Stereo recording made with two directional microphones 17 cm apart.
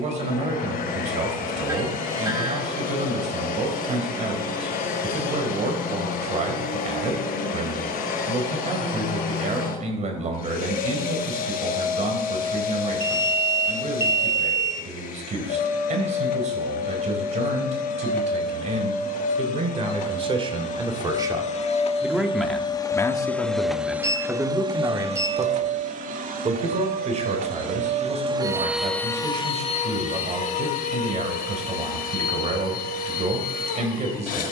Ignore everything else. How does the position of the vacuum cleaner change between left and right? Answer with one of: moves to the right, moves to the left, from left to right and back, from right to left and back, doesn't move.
from left to right and back.